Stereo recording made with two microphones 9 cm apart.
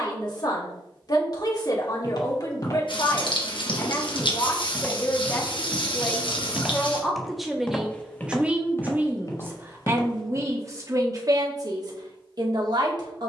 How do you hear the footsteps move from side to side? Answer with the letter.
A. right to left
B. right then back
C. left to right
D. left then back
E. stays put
B.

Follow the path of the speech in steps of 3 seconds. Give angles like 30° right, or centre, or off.
50° left, 30° left, centre, 40° right, 50° right.